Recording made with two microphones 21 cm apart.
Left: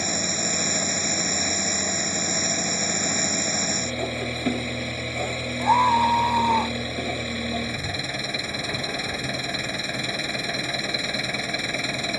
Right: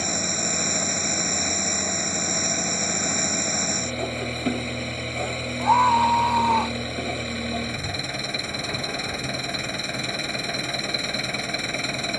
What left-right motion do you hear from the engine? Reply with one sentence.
You can hear the engine stay put.